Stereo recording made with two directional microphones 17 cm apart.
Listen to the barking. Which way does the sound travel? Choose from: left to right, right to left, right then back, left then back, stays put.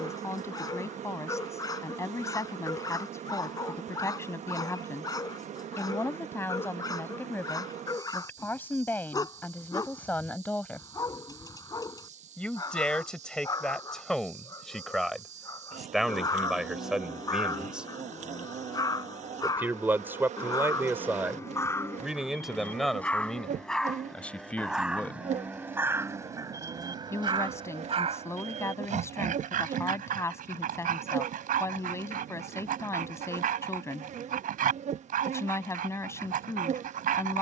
left to right.